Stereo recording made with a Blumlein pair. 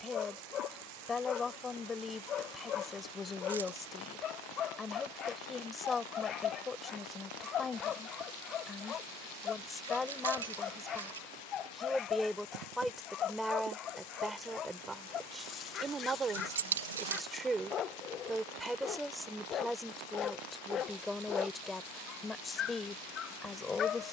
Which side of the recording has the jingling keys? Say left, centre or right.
right.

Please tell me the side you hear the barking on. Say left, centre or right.
left.